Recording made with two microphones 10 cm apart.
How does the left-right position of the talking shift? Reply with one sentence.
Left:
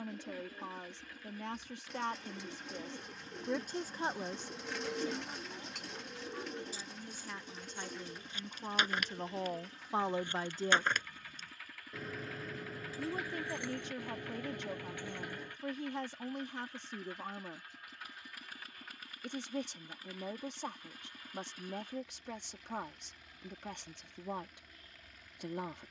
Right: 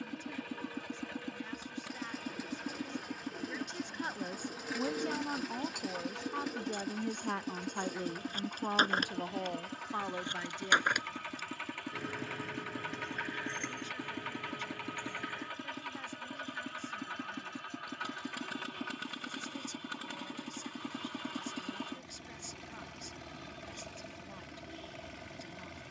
You can hear the talking go right and come back.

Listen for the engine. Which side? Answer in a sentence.
You can hear the engine on the right.